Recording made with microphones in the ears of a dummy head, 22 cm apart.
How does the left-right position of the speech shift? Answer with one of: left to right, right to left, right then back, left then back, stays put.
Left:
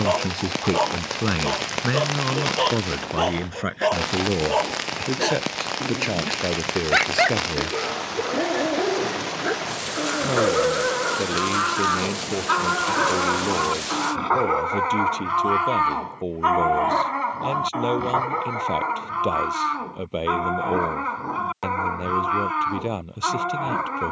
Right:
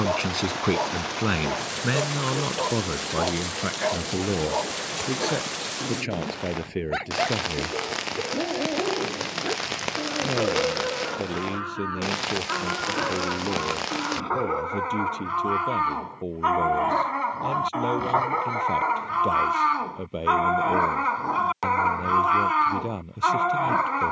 right to left.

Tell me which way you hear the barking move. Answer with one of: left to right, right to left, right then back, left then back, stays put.
left to right.